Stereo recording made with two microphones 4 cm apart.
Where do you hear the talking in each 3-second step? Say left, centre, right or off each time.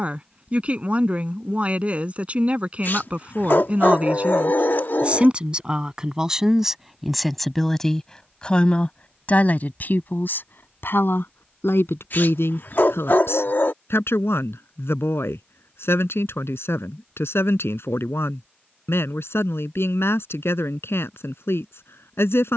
right, right, centre, left, left, left, left, left.